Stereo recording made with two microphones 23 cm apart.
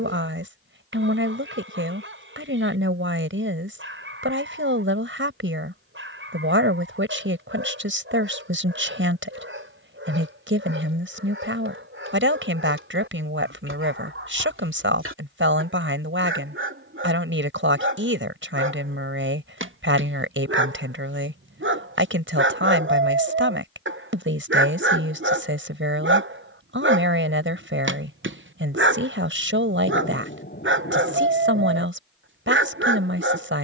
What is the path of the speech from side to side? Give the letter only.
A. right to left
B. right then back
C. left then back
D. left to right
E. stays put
E.